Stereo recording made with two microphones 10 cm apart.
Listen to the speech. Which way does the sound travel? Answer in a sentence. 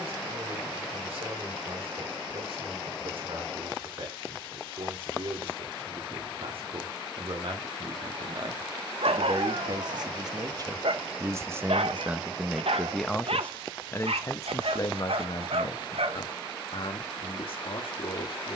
In this clip you hear the speech go from the right side to the left.